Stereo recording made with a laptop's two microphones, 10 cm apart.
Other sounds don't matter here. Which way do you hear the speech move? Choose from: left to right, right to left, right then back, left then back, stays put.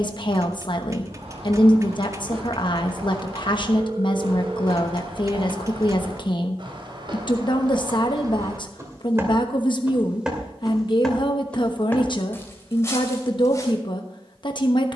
stays put.